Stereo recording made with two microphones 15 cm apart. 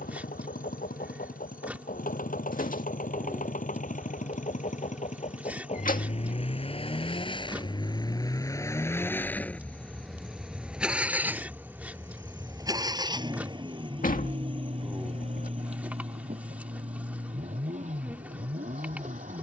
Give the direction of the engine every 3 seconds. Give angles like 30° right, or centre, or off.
70° left, 50° left, 30° left, centre, 30° right, 50° right, 50° right.